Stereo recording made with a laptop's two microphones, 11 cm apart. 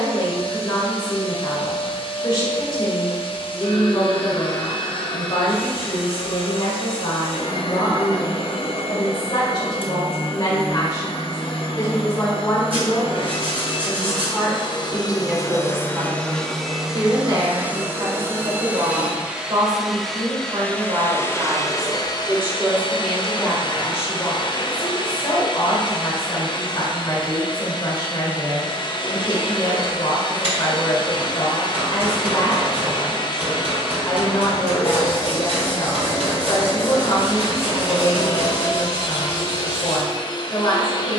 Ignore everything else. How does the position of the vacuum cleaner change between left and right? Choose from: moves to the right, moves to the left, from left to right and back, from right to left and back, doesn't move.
from left to right and back.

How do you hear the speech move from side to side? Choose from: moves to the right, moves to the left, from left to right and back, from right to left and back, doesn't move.
from left to right and back.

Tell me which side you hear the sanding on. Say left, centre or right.
right.